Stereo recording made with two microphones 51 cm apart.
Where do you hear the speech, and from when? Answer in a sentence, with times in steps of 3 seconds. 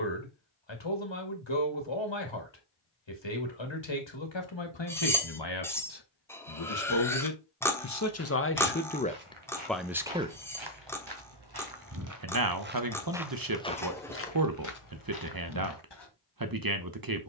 You can hear the speech on the left from 0 s, in the centre from 9 s and on the right from 12 s.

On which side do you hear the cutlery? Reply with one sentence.
You can hear the cutlery in the centre.